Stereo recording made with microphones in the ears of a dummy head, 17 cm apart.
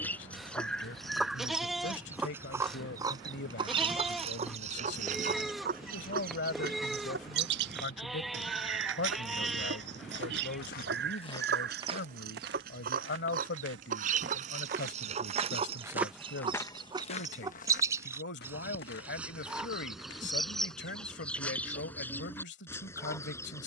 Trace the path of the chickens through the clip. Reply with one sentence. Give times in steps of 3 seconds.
In this clip you hear the chickens in the centre from 0 s, on the right from 3 s and in the centre from 18 s.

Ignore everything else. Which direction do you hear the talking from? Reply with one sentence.
In this clip you hear the talking on the left.